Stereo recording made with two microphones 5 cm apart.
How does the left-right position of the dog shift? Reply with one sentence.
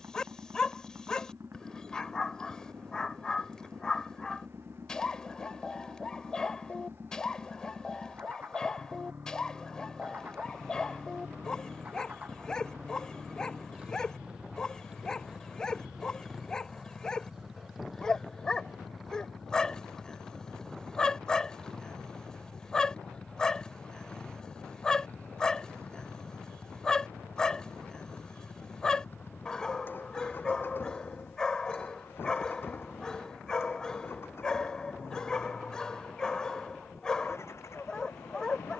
In this clip you hear the dog stay put.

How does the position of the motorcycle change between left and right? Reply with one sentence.
In this clip you hear the motorcycle move from right to left.